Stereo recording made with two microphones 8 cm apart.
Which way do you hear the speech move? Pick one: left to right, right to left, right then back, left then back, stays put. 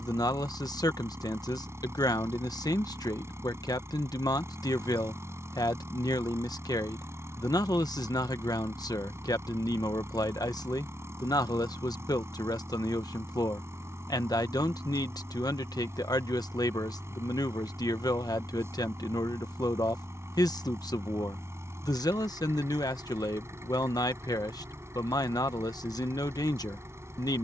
stays put.